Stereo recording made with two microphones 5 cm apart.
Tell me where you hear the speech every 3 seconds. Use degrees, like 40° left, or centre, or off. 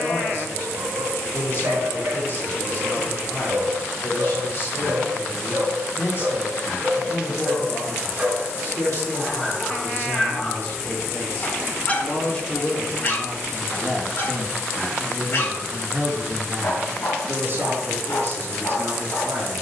40° left, 40° left, 40° left, 40° left, 10° left, 40° right, 60° right.